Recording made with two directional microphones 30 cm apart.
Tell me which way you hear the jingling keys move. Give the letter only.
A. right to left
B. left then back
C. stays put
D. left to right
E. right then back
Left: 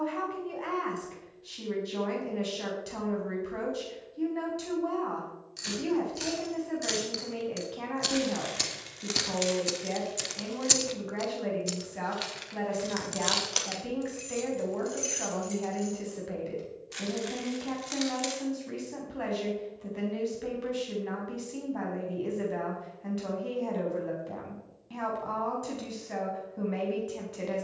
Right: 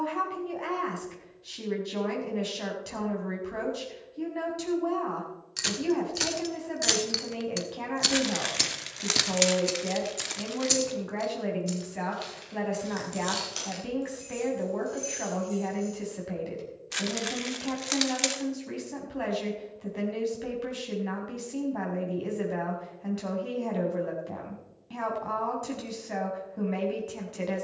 A.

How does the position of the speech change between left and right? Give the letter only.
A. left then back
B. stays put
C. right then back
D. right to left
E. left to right
B.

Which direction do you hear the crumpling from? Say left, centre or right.
right.